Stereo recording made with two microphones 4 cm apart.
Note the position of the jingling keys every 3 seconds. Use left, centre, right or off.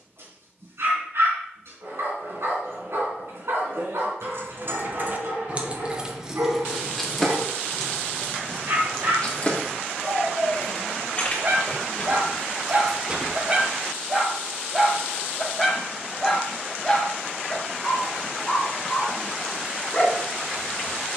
off, right, centre, left, centre, off, off.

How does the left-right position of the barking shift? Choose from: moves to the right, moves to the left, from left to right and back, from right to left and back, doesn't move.
moves to the left.